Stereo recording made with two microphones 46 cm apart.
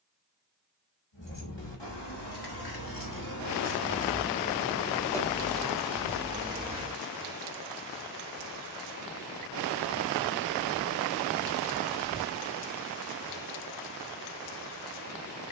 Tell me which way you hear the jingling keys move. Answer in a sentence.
In this clip you hear the jingling keys move to the right.